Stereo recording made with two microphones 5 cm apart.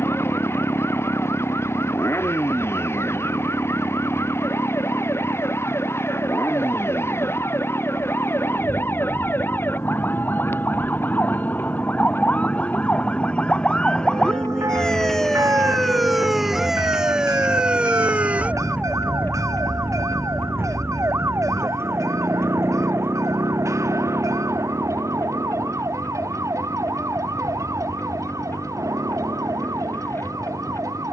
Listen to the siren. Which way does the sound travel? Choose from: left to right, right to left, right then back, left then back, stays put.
left to right.